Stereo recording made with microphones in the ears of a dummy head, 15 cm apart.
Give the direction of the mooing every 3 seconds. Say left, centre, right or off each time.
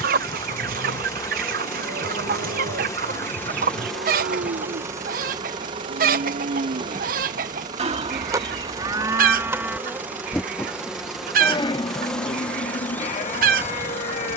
right, right, right, centre, left.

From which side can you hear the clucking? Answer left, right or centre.
right.